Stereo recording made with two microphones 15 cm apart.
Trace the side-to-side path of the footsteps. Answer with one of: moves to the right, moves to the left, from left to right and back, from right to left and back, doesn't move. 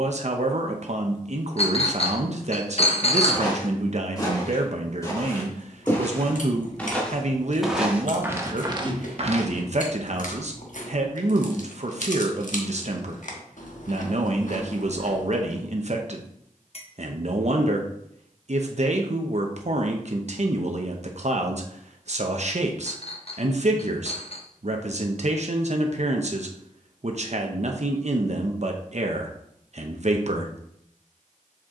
moves to the right.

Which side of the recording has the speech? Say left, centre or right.
right.